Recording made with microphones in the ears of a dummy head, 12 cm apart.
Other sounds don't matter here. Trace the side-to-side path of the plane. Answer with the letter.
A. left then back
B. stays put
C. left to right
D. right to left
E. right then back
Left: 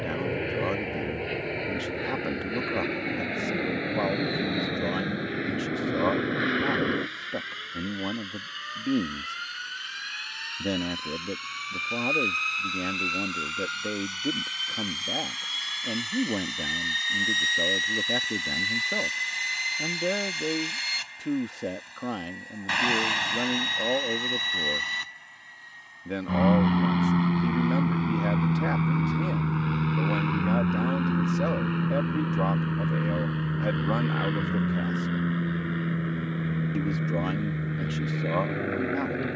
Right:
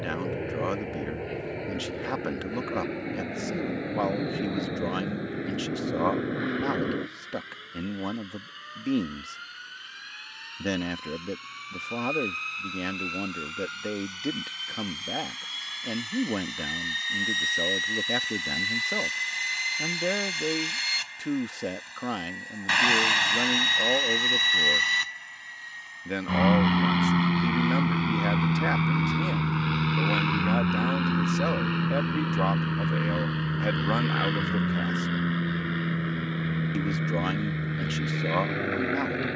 C.